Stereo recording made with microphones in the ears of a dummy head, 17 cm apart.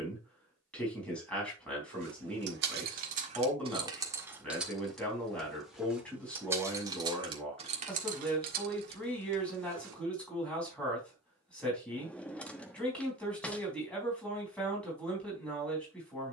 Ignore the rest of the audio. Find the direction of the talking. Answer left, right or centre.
centre.